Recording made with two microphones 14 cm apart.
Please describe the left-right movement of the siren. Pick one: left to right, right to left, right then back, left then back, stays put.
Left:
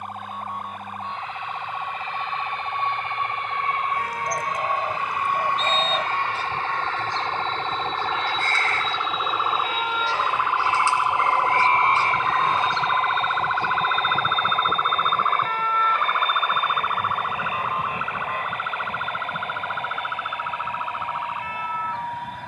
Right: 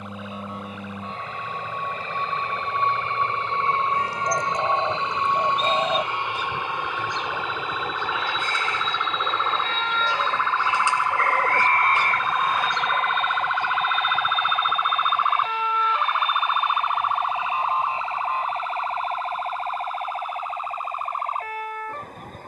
left to right.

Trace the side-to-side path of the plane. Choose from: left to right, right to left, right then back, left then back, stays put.
right to left.